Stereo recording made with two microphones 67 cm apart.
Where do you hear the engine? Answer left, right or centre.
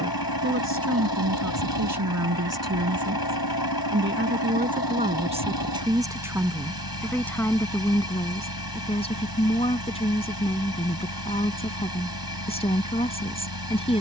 left.